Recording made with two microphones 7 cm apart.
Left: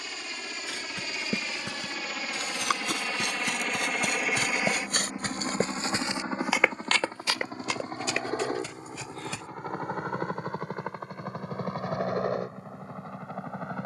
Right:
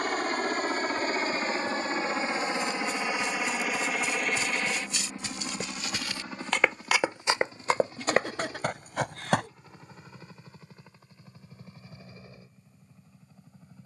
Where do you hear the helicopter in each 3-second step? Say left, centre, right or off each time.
right, centre, left, left, left.